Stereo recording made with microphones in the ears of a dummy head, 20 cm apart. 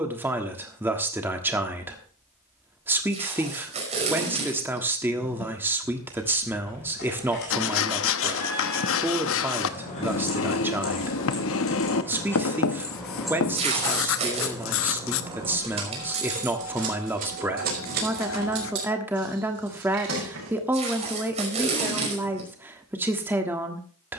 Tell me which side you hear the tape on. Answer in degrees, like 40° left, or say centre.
30° right.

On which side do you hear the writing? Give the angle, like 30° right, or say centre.
60° left.